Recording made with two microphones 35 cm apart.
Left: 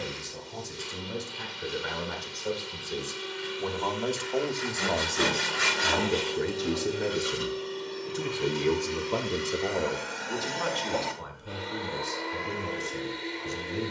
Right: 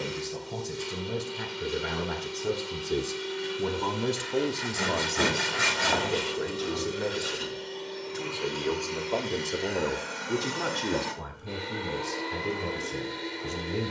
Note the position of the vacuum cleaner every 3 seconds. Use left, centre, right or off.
right, right, centre, centre, right.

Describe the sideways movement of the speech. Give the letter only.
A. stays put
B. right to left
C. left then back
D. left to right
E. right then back
C.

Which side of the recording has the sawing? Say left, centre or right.
right.